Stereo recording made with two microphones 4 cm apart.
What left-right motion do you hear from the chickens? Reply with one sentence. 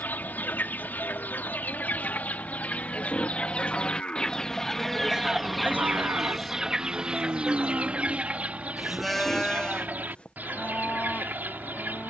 You can hear the chickens travel towards the right.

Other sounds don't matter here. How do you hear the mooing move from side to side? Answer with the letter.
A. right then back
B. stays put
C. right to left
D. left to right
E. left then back
A.